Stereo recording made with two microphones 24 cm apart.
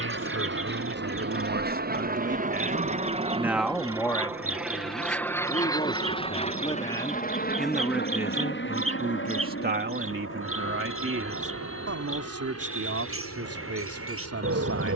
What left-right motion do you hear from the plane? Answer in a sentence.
You can hear the plane go from the right side to the left.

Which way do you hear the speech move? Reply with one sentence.
You can hear the speech move from right to left and back again.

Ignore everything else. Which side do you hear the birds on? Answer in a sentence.
In this clip you hear the birds on the right.